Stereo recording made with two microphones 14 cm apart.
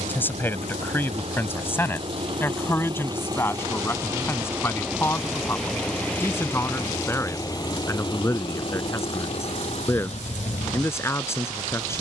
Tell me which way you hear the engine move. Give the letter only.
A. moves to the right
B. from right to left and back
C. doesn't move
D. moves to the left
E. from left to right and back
D.